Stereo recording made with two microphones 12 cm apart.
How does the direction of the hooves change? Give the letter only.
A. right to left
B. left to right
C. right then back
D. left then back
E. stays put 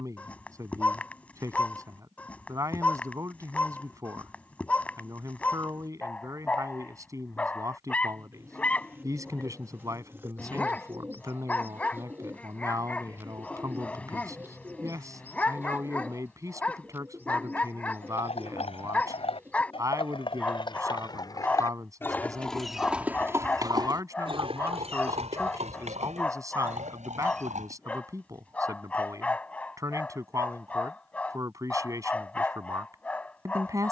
B.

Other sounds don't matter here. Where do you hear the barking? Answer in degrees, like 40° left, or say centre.
10° left.